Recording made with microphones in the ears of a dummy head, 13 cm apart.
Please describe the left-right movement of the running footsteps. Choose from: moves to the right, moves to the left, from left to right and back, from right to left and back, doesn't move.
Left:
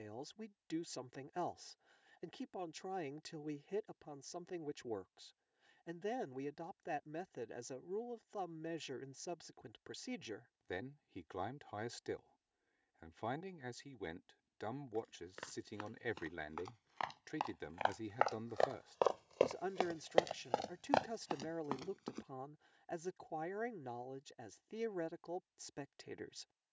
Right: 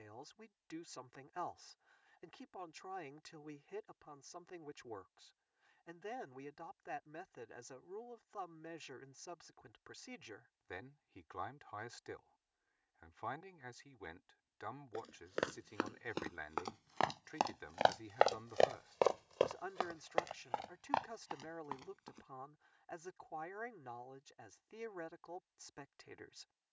moves to the left.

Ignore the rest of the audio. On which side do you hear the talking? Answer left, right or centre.
left.